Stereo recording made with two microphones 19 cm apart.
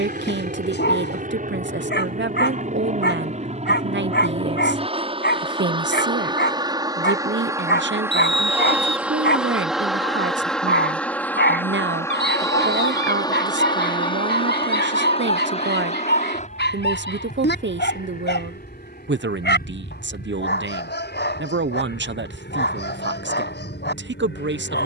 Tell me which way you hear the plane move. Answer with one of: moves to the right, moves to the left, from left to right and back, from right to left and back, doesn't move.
moves to the left.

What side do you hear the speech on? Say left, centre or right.
right.